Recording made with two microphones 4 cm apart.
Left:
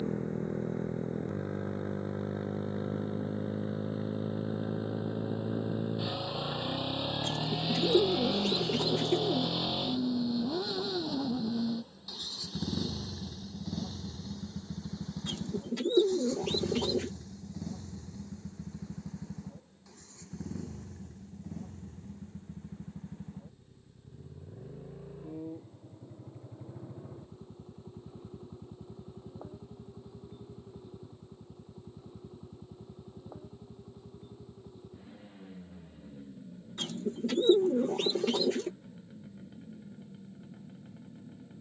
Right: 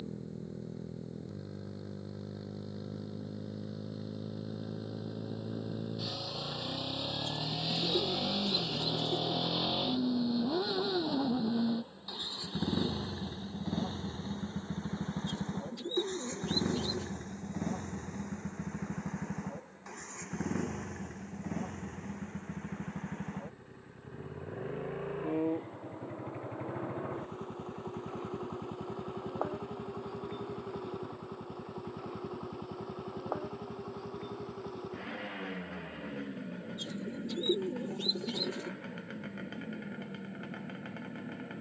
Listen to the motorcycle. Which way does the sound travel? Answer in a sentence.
In this clip you hear the motorcycle go from the left side to the right.